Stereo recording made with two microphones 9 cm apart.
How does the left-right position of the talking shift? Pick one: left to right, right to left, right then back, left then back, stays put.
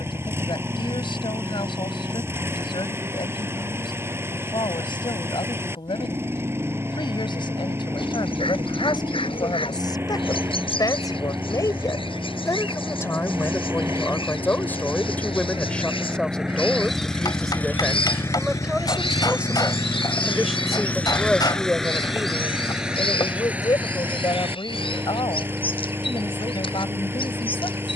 right then back.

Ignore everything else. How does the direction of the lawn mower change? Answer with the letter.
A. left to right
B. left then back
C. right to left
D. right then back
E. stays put
B.